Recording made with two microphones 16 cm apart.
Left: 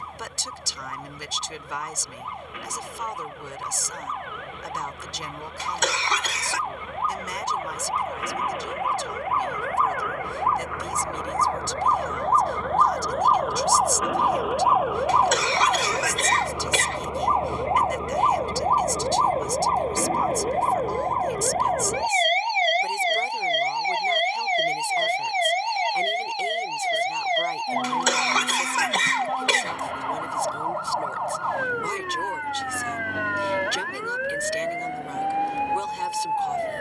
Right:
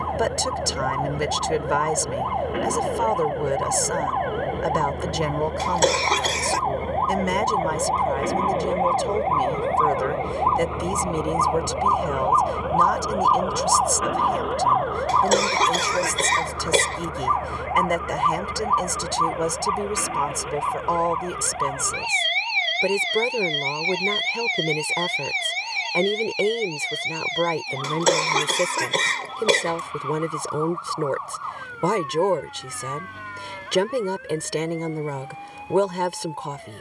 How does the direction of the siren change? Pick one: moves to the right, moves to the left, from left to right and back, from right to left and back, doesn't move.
moves to the left.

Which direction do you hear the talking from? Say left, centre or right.
right.